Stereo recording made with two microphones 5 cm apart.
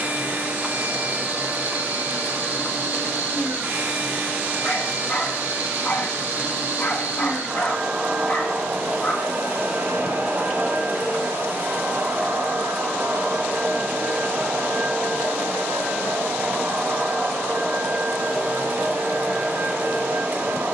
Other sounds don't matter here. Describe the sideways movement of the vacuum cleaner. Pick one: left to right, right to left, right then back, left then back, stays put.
stays put.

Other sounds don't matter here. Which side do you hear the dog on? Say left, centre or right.
left.